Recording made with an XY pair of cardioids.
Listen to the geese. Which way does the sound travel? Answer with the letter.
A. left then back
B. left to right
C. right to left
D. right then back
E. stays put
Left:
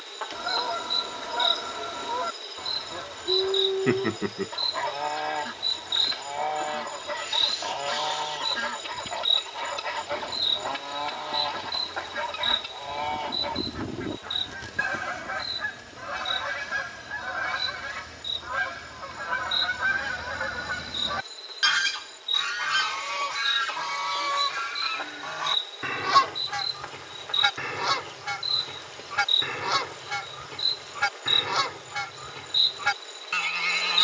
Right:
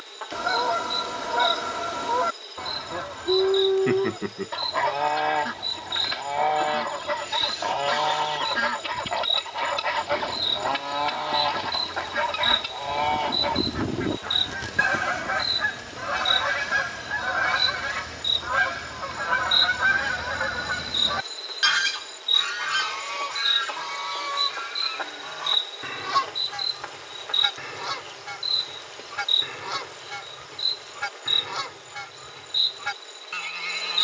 C.